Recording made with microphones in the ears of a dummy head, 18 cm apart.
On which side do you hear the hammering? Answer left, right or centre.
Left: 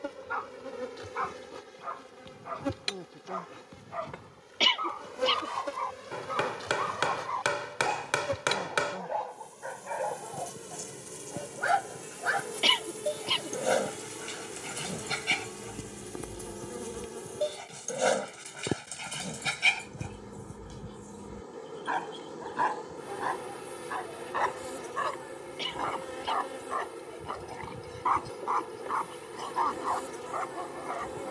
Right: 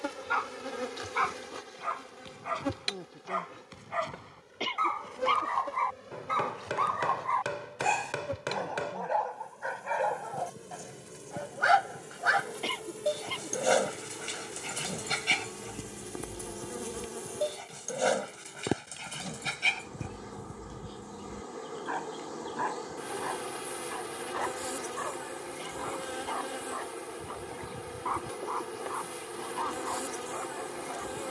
left.